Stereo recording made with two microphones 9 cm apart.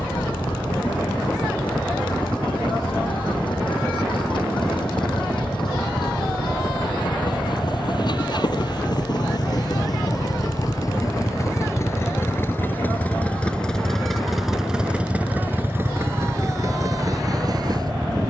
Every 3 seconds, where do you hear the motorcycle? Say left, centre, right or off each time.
left, left, left, left, centre, right.